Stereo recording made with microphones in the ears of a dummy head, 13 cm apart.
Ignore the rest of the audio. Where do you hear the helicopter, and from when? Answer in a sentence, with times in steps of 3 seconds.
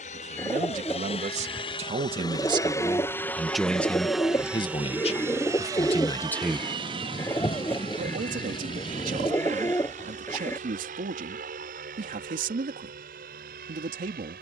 You can hear the helicopter on the left from 0 s, in the centre from 3 s and on the right from 6 s.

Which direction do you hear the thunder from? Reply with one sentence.
In this clip you hear the thunder on the left.